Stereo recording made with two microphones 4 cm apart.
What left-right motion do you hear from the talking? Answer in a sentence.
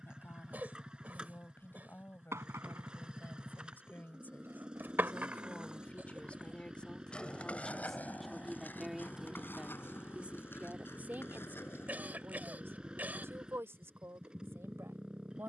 In this clip you hear the talking move to the right.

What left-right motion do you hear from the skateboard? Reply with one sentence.
In this clip you hear the skateboard go from the right side to the left.